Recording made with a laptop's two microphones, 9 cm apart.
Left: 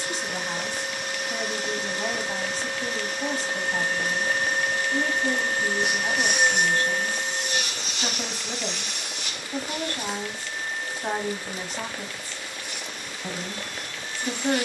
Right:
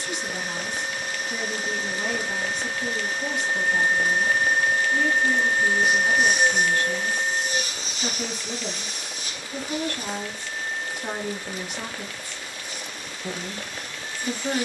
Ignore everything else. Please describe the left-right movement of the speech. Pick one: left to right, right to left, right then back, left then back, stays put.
stays put.